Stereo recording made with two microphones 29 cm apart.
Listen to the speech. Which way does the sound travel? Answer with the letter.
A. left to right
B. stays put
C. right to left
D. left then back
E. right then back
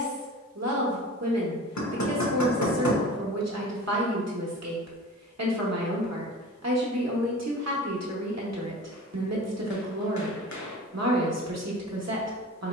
B.